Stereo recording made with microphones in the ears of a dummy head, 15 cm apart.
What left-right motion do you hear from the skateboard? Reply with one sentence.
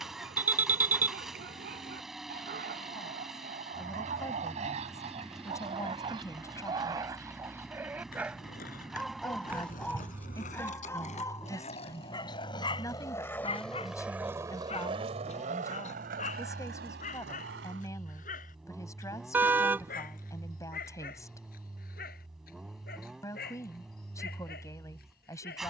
You can hear the skateboard move to the right.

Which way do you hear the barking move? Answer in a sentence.
You can hear the barking move to the left.